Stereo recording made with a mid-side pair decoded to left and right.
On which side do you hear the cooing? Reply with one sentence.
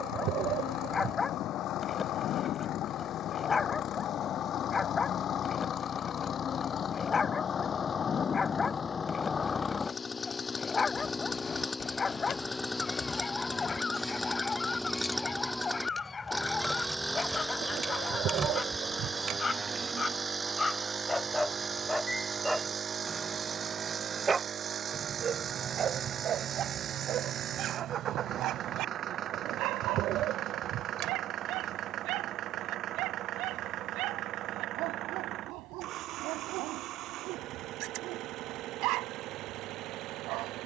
In this clip you hear the cooing on the right.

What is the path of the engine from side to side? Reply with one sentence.
In this clip you hear the engine travel towards the right.